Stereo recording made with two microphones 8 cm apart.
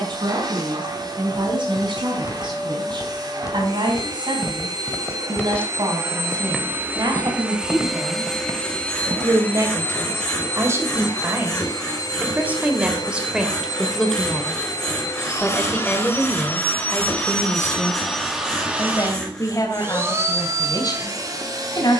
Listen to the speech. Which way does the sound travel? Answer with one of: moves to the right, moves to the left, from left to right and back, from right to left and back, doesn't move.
moves to the left.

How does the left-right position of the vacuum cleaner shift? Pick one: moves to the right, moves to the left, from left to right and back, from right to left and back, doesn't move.
from right to left and back.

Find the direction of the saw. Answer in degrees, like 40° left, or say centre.
10° left.